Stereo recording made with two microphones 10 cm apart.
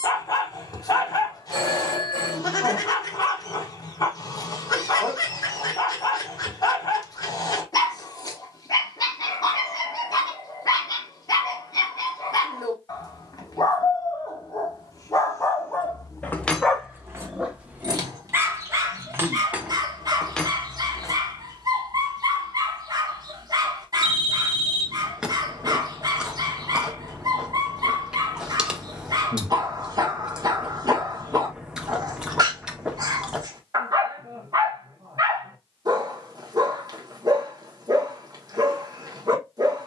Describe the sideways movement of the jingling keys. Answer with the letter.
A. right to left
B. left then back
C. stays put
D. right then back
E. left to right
D.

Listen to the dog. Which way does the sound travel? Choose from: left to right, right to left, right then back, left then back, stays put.
left to right.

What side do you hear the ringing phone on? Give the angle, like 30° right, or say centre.
50° right.